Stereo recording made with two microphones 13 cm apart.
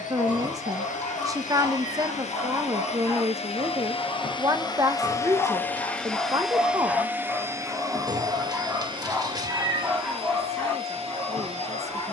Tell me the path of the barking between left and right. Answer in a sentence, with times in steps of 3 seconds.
In this clip you hear the barking on the left from 0 s and in the centre from 6 s.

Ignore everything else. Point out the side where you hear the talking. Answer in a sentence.
You can hear the talking on the right.